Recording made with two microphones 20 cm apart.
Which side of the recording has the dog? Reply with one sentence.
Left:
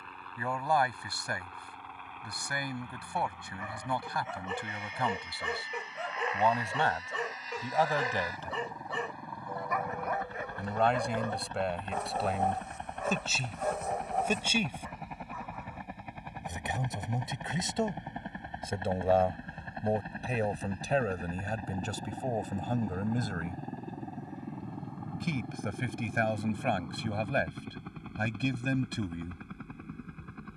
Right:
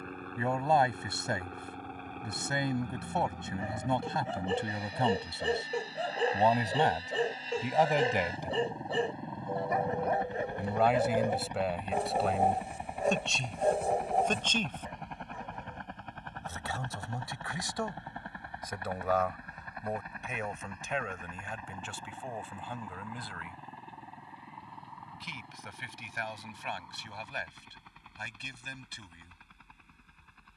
You can hear the dog on the right.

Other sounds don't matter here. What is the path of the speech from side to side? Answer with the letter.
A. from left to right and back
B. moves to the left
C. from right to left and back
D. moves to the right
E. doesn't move
B.